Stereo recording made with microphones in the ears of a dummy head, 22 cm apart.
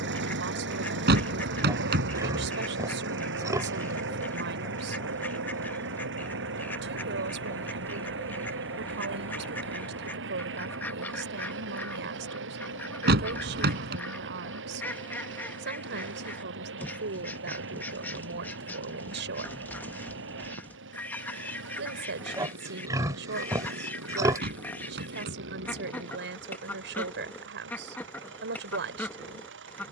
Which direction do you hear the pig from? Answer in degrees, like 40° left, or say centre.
10° right.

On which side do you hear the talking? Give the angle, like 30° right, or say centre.
50° right.